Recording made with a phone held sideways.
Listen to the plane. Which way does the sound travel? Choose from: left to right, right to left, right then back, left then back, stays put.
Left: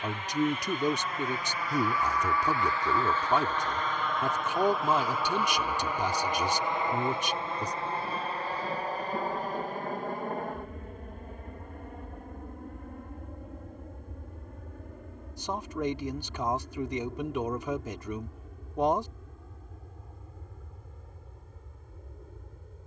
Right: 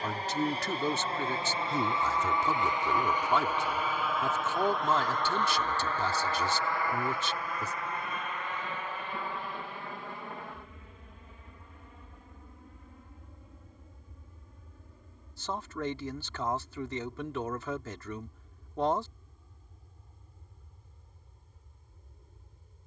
right to left.